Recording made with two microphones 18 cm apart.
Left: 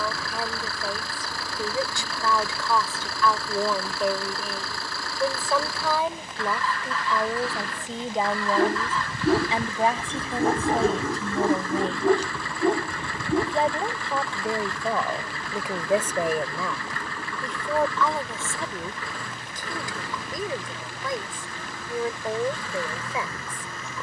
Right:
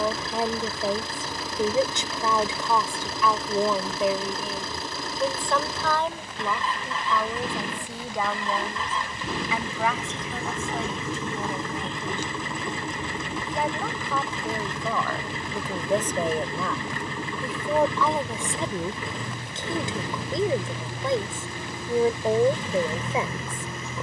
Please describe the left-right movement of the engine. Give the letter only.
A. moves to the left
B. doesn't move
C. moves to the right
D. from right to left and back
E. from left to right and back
B.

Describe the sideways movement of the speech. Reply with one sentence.
In this clip you hear the speech move from right to left and back again.